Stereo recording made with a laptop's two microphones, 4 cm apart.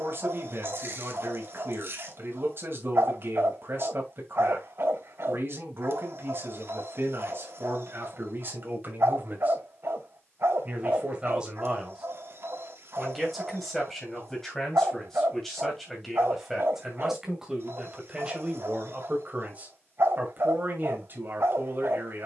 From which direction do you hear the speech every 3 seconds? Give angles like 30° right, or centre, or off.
60° right, 60° right, 50° right, 30° right, centre, centre, 30° right, 50° right.